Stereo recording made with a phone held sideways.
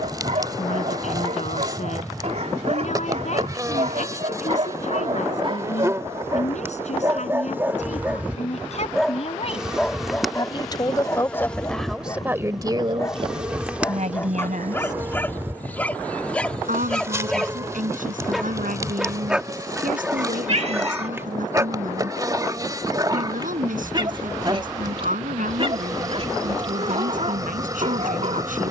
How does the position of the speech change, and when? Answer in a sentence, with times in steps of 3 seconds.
You can hear the speech on the left from 0 s and on the right from 12 s.